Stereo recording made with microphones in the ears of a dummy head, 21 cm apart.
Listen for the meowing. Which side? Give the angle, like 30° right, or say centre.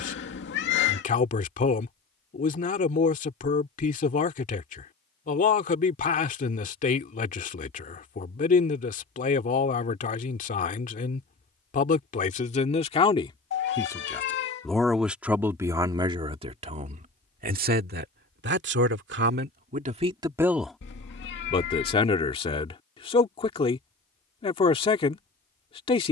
50° left.